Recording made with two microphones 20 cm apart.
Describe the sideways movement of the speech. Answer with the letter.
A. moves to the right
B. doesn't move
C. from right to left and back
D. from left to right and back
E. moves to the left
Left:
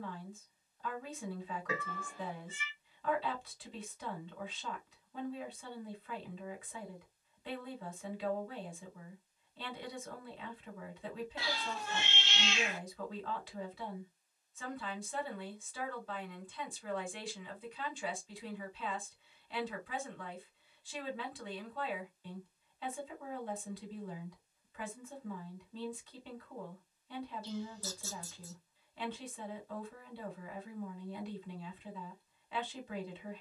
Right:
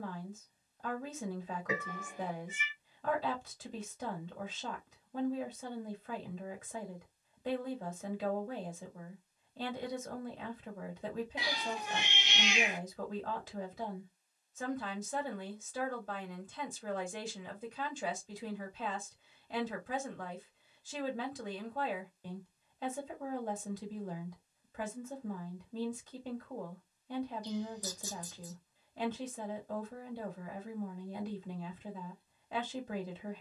B.